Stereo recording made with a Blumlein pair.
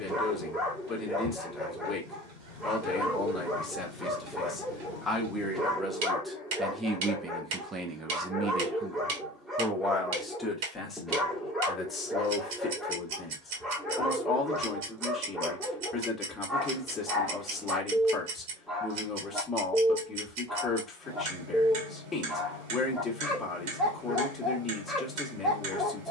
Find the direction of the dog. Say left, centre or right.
centre.